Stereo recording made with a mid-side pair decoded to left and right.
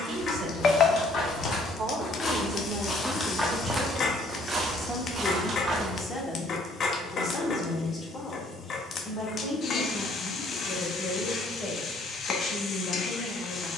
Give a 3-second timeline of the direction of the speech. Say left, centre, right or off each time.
right, centre, left, left, left.